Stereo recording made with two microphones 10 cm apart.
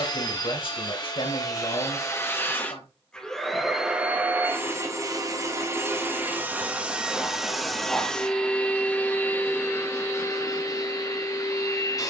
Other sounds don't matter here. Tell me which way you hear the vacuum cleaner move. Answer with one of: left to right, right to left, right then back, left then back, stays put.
right then back.